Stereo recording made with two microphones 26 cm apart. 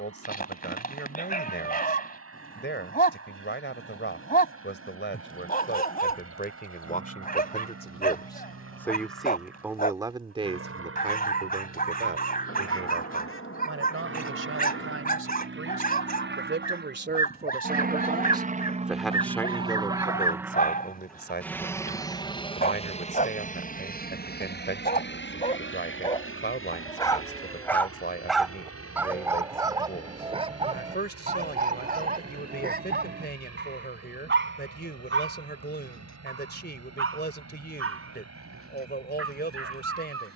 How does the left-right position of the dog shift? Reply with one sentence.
You can hear the dog move from left to right.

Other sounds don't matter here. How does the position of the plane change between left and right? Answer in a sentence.
In this clip you hear the plane go from the right side to the left.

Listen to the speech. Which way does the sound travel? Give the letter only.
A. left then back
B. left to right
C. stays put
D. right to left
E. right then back
E.